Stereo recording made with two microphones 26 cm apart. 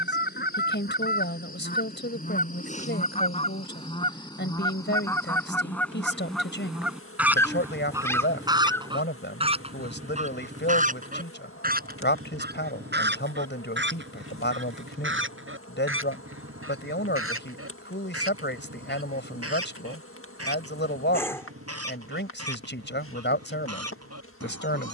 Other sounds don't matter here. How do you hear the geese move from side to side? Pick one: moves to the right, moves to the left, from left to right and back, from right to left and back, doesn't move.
moves to the right.